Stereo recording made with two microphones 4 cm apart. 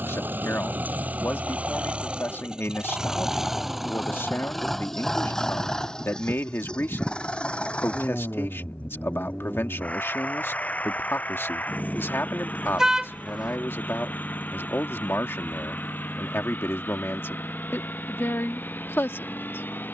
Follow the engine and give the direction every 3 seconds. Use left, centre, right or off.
right, centre, left, left, left, left, left.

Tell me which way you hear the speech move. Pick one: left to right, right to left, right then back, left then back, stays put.
stays put.